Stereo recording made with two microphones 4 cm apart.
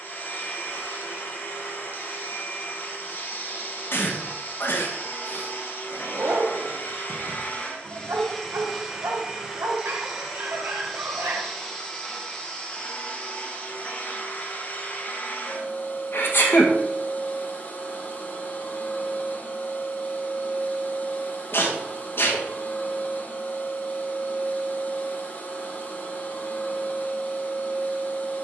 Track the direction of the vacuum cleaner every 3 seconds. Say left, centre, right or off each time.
left, left, left, centre, left, left, left, left, left, left.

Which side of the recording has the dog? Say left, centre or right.
right.